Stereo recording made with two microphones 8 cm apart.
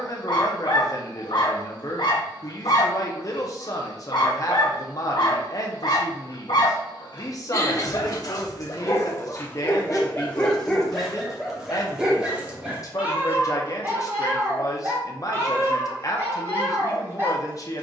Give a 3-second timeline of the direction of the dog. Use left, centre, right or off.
left, left, left, centre, right, right.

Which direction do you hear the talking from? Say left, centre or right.
left.